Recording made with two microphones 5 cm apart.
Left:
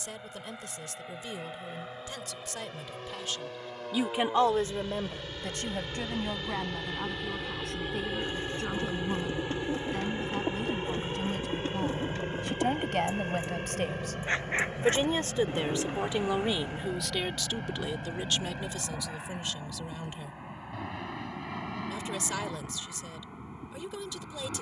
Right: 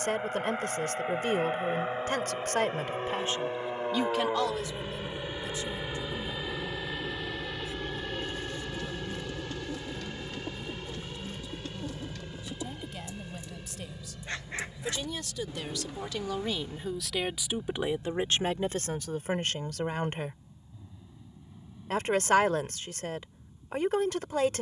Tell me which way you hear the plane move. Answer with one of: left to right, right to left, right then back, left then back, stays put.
right to left.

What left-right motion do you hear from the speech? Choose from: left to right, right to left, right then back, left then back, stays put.
left then back.